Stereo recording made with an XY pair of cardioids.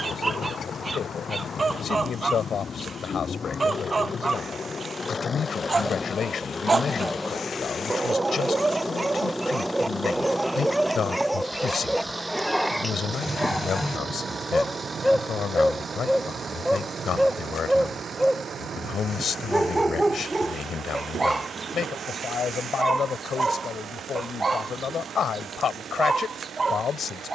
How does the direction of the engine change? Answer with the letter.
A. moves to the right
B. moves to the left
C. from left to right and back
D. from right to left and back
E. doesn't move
A.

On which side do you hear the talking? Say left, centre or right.
left.